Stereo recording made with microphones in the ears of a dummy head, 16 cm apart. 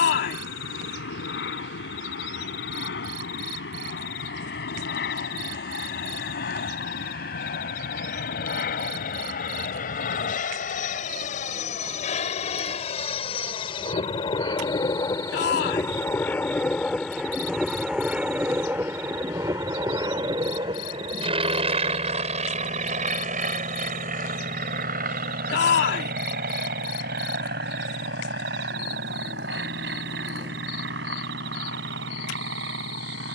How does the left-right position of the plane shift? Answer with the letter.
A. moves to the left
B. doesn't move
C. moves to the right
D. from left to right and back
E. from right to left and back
C.